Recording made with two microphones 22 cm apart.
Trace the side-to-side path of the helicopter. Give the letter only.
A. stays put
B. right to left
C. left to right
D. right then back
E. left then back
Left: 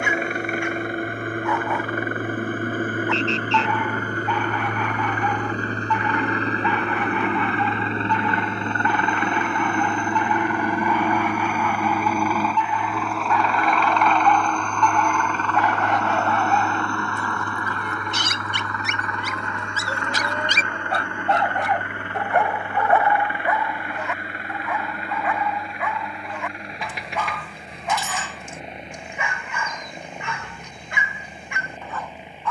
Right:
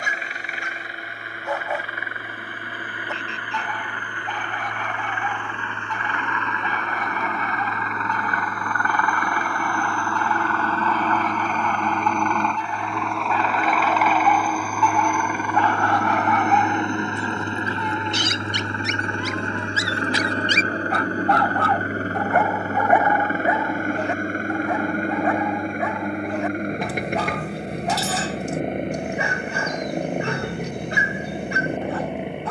C.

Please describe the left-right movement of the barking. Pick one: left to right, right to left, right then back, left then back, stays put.
left then back.